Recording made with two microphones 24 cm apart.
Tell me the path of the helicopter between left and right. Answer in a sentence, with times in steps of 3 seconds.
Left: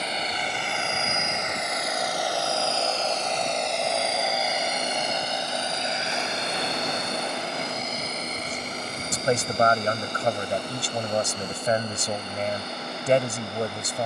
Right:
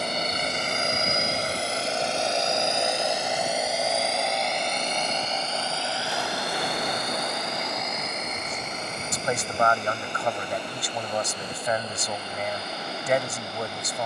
You can hear the helicopter on the right from 0 s, in the centre from 3 s and on the left from 6 s.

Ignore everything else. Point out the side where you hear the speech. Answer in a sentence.
You can hear the speech on the left.